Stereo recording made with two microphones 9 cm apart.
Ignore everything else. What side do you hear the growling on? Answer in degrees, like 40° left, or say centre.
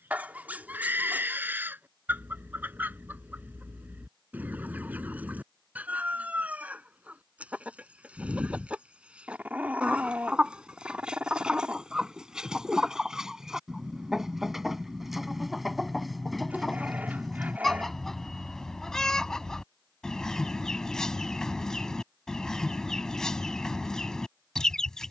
20° right.